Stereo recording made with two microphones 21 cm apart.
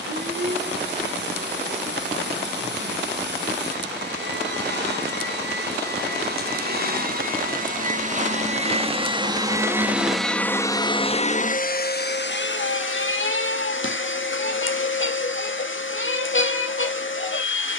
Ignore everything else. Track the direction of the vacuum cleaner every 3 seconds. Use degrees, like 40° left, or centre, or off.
50° right, 50° right, 40° right, 10° left, 60° left, 70° left.